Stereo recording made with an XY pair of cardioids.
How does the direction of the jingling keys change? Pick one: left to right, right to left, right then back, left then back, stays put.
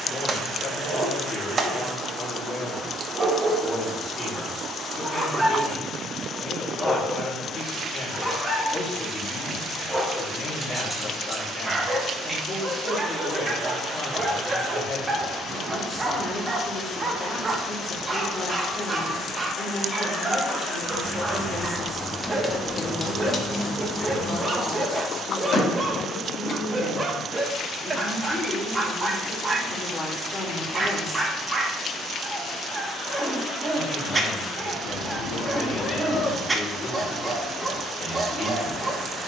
right to left.